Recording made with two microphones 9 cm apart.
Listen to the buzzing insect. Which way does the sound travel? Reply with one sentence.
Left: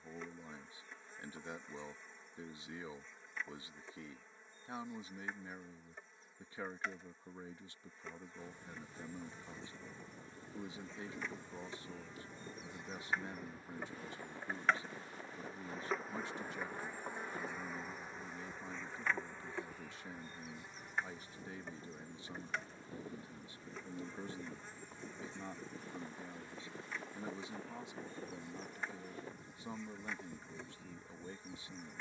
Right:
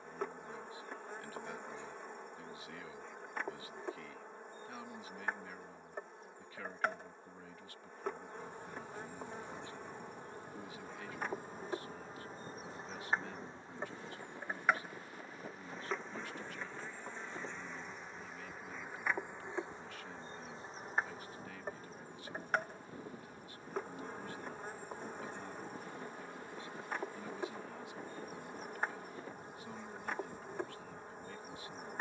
You can hear the buzzing insect go left and come back.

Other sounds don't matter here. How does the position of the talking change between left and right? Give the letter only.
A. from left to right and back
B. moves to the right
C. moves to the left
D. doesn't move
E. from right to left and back
D.